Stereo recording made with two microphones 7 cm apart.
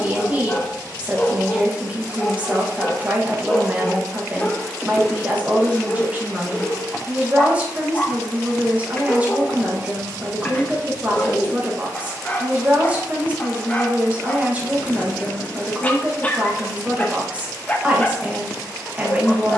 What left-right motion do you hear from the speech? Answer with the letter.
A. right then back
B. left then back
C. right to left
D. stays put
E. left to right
D.